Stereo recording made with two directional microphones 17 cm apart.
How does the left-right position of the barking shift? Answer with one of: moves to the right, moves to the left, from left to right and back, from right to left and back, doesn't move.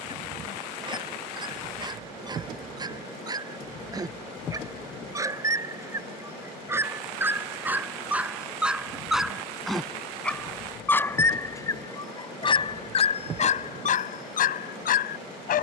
moves to the left.